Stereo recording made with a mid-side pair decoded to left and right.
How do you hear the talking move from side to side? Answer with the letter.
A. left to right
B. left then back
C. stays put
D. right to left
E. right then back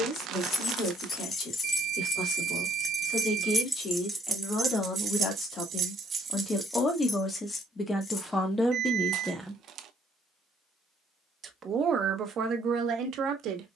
A.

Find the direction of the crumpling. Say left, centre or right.
right.